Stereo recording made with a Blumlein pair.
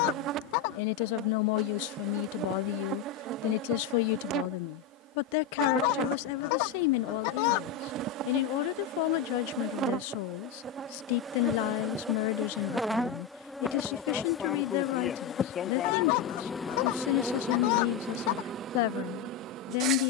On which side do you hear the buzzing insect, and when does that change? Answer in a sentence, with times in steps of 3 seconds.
In this clip you hear the buzzing insect on the right from 0 s, in the centre from 12 s and on the right from 18 s.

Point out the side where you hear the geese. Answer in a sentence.
You can hear the geese on the left.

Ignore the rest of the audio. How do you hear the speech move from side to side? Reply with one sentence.
In this clip you hear the speech stay in one place.